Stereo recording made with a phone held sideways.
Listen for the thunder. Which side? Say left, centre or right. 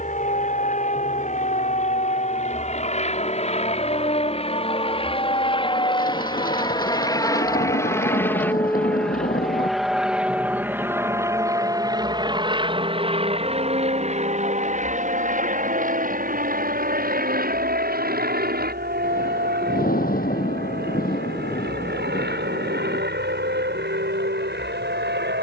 left.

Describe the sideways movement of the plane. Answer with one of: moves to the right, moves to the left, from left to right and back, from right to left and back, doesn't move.
moves to the right.